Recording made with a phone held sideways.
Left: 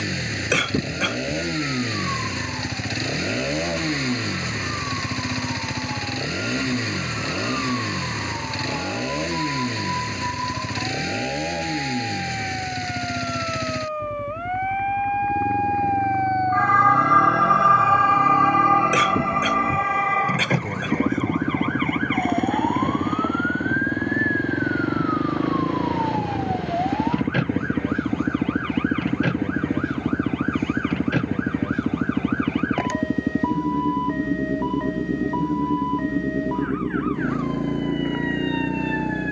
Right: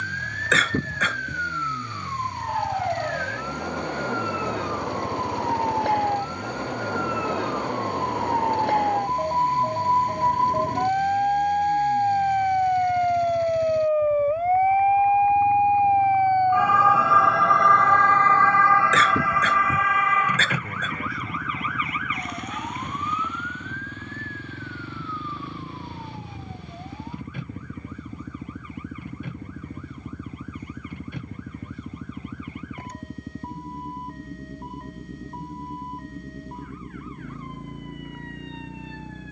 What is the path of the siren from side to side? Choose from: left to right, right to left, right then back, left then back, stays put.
right to left.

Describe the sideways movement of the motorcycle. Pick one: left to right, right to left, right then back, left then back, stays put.
stays put.